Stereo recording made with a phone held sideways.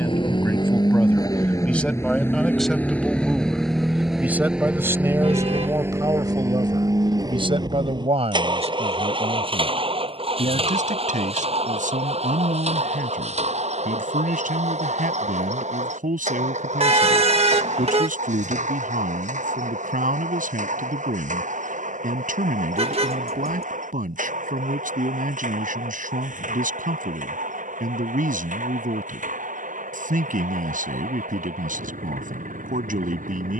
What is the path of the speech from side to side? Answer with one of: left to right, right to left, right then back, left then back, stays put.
left to right.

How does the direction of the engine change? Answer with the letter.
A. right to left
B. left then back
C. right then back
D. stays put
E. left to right
E.